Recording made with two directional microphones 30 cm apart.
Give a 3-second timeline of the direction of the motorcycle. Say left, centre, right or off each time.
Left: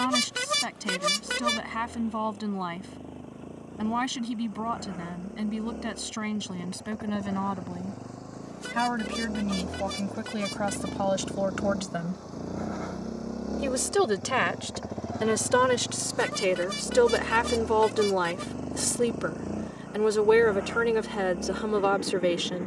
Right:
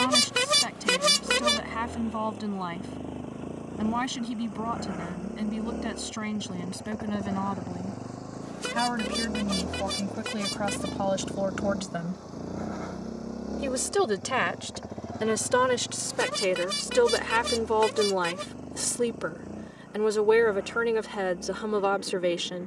right, right, right, centre, centre, left, left, left.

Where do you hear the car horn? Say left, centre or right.
right.